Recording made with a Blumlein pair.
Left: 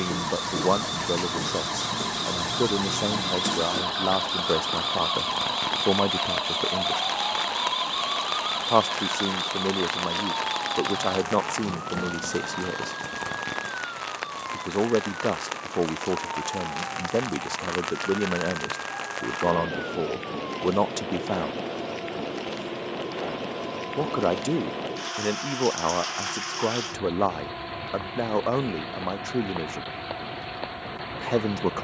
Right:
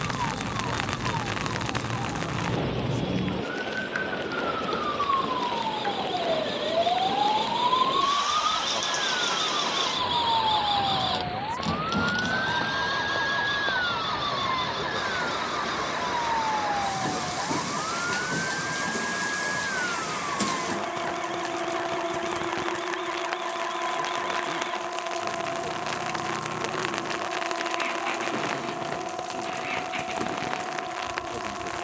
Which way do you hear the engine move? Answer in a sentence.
In this clip you hear the engine go from the left side to the right.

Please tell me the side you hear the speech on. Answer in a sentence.
In this clip you hear the speech on the left.